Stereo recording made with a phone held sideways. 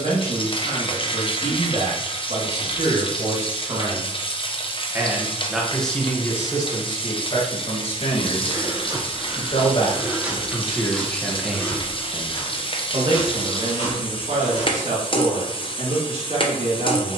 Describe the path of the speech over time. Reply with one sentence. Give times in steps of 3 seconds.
In this clip you hear the speech on the right from 0 s, on the left from 6 s and on the right from 12 s.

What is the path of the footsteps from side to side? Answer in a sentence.
You can hear the footsteps move from right to left.